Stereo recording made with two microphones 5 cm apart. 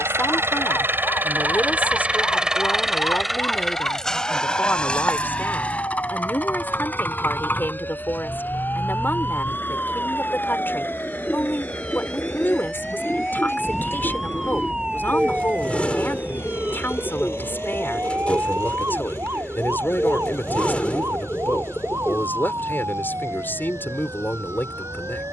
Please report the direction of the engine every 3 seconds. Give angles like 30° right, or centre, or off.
30° right, 10° left, 40° left, 40° left, 50° left, 50° left, 50° left, 50° left, 60° left.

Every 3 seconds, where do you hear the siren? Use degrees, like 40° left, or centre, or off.
60° left, 50° left, 40° left, 30° left, centre, 30° right, 50° right, 70° right, 70° right.